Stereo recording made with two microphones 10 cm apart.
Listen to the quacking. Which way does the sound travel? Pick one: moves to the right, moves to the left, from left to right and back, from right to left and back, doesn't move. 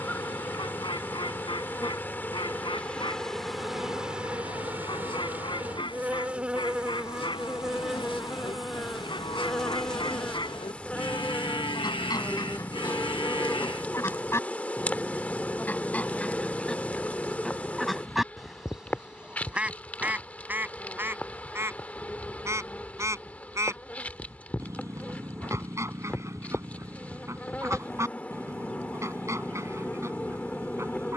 moves to the right.